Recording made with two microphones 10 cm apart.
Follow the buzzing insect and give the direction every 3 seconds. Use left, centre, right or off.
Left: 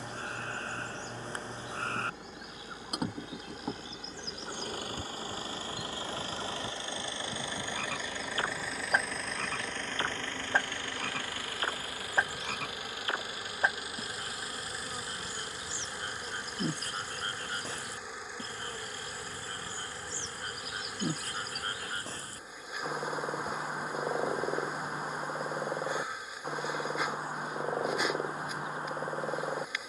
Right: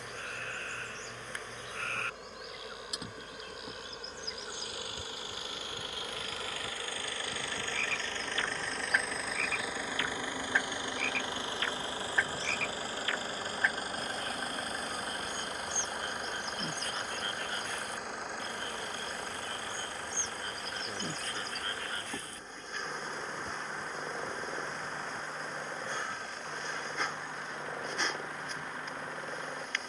right, right, right, centre, centre, centre, centre, centre, centre, centre.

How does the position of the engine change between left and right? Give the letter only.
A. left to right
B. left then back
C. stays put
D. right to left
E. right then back
A.